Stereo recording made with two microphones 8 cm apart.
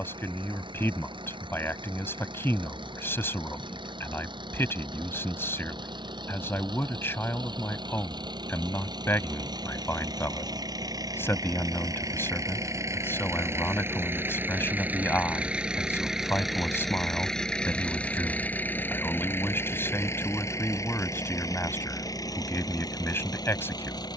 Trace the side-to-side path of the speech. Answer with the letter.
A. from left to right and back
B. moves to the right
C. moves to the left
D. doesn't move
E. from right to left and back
D.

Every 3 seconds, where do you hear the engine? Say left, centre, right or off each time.
right, right, right, right, right, centre, left, left.